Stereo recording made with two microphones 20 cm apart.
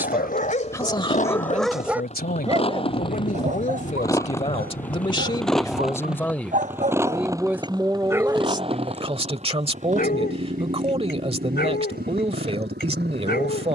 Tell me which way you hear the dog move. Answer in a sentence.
In this clip you hear the dog move from left to right and back again.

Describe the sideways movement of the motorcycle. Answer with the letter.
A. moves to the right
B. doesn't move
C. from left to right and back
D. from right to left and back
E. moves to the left
A.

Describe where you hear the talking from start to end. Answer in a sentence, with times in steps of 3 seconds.
You can hear the talking on the left from 0 s, in the centre from 6 s and on the right from 9 s.